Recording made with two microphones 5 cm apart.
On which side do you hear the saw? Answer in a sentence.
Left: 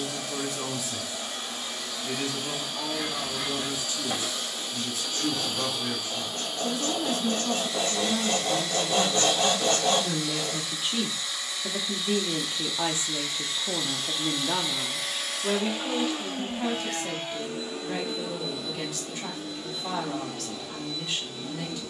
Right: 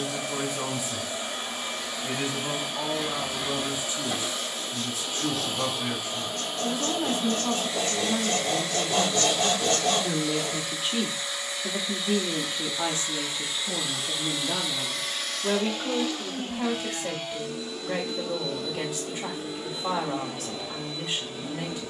You can hear the saw on the left.